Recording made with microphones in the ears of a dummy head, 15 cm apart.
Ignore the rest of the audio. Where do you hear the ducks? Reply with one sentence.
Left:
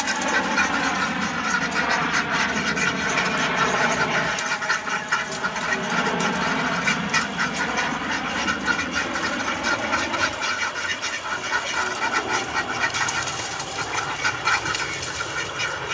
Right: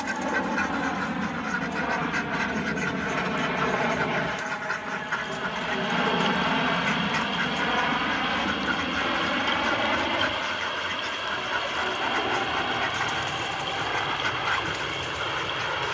In this clip you hear the ducks on the left.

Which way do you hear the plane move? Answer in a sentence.
You can hear the plane move from left to right.